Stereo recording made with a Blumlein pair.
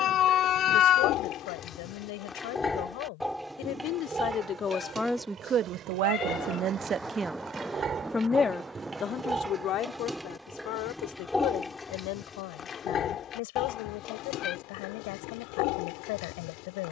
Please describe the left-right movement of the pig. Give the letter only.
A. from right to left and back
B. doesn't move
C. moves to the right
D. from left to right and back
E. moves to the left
D.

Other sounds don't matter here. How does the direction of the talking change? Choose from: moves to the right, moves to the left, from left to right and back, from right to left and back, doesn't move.
from left to right and back.